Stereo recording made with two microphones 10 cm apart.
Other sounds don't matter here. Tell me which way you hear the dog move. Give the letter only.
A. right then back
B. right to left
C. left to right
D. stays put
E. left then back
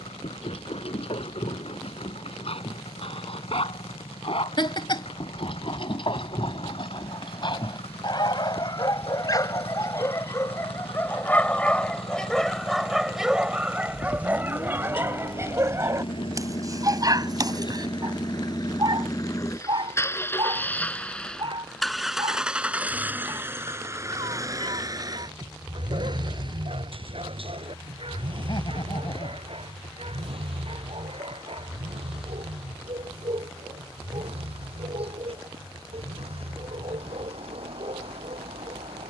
C.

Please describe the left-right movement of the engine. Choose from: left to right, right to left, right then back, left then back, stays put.
left to right.